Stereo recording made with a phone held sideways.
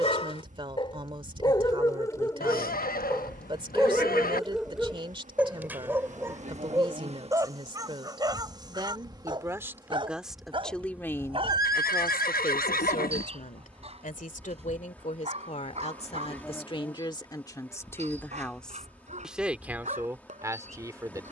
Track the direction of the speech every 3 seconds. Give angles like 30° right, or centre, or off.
30° right, 30° right, 30° right, centre, 50° left, 40° left, 10° right.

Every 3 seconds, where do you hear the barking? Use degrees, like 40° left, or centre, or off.
30° left, centre, 20° right, 30° right, 40° right, 40° right, 50° right.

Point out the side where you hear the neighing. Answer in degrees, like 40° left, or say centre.
70° left.